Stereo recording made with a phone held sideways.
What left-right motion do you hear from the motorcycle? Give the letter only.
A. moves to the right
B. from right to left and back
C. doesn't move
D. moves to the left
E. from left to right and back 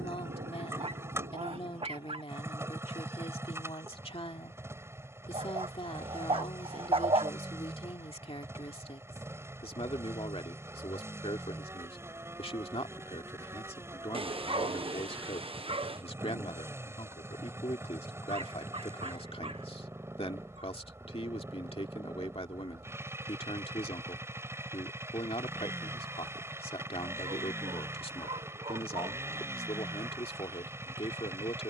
C.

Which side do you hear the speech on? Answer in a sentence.
You can hear the speech on the left.